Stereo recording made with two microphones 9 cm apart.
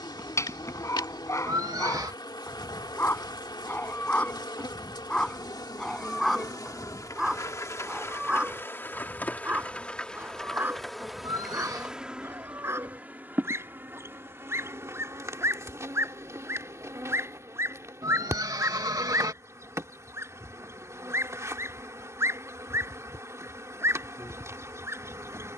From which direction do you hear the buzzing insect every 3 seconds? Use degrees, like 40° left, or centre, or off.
50° left, 50° left, 30° left, 10° left, 20° right, 30° right, 30° right, 30° right, 30° right.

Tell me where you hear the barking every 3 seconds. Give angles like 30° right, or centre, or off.
30° left, 10° left, 10° right, 20° right, 30° right, 30° right, 30° right, 30° right, 30° right.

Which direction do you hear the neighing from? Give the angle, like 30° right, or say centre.
40° right.